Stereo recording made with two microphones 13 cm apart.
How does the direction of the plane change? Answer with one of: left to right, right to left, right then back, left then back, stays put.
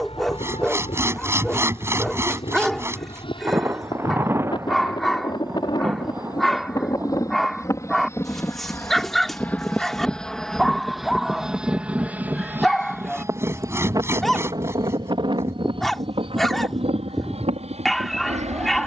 left to right.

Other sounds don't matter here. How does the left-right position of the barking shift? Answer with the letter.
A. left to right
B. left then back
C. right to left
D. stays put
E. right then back
D.